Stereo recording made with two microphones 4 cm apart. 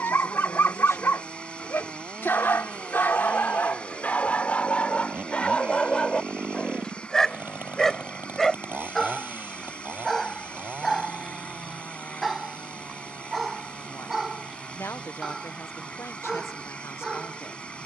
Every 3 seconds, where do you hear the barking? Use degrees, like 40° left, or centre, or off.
50° left, 30° left, 10° left, centre, 10° right, 10° right.